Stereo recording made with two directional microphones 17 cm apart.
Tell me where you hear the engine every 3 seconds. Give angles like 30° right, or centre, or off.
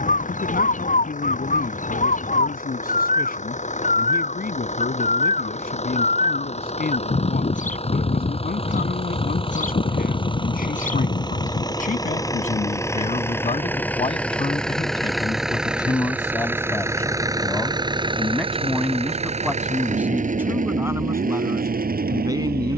50° left, 40° left, 40° left, 30° left, 10° left, 10° right, 40° right, 60° right.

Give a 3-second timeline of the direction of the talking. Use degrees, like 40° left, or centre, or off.
60° left, 60° left, 60° left, 60° left, 40° left, 20° left, 10° right, 20° right.